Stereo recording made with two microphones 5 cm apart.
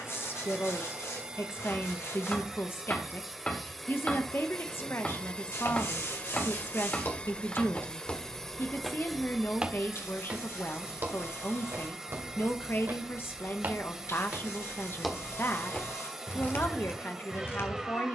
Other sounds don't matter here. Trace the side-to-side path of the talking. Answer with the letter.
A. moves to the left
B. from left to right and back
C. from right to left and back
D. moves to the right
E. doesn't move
E.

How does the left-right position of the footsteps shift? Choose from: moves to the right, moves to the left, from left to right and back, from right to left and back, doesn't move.
from left to right and back.